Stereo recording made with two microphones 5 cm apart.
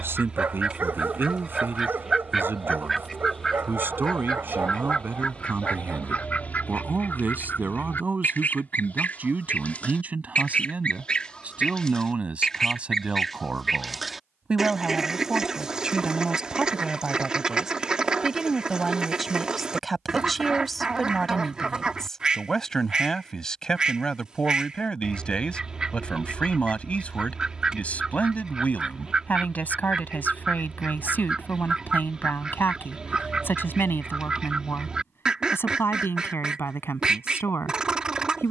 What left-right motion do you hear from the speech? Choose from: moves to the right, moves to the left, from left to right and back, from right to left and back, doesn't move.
moves to the left.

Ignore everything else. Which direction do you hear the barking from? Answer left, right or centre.
right.